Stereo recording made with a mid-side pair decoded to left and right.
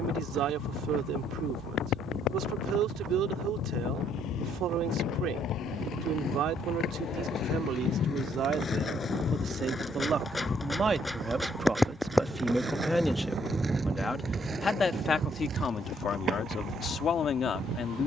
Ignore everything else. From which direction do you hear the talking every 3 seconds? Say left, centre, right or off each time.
right, right, right, right, centre, left.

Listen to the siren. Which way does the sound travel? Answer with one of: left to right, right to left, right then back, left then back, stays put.
left to right.